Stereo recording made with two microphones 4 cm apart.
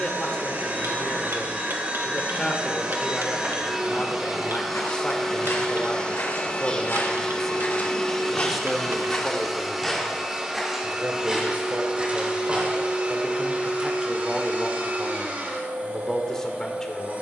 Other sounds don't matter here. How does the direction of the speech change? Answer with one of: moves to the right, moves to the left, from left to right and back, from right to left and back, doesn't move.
from left to right and back.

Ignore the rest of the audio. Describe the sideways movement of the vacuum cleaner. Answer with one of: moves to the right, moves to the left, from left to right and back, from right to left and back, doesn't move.
from right to left and back.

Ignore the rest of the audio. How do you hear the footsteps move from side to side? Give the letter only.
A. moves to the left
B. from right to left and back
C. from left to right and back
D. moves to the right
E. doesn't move
D.